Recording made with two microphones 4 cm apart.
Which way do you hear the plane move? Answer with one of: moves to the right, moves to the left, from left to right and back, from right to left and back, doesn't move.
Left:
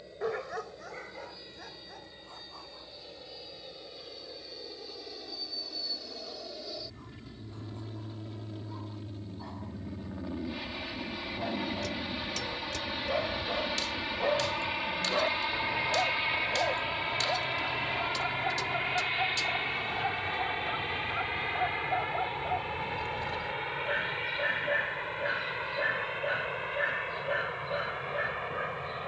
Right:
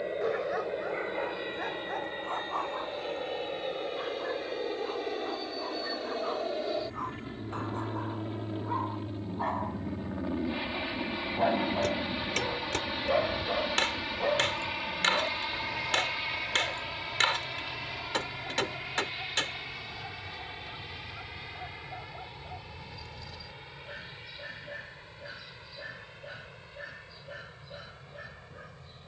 moves to the left.